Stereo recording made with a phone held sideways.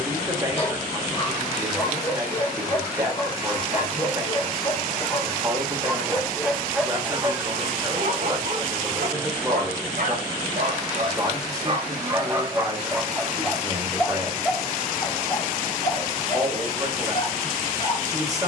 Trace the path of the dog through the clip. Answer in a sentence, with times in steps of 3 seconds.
You can hear the dog on the left from 0 s, on the right from 6 s, in the centre from 12 s and on the left from 15 s.